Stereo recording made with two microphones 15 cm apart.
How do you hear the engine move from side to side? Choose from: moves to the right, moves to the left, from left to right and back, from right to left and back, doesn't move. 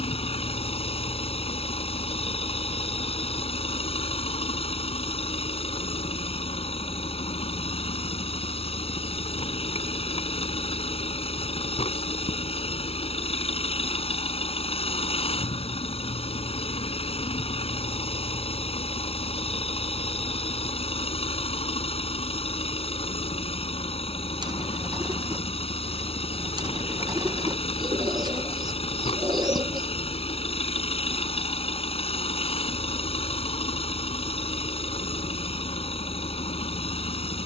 doesn't move.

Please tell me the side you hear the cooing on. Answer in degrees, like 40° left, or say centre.
30° right.